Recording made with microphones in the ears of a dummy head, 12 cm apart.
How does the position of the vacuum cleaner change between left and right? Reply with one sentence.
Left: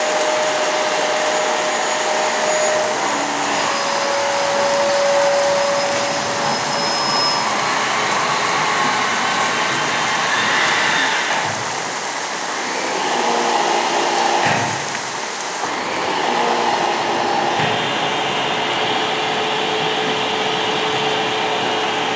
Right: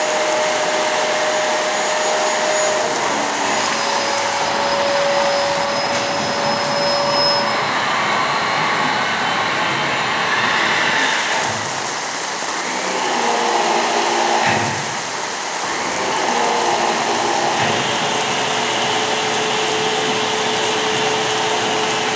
You can hear the vacuum cleaner go right and come back.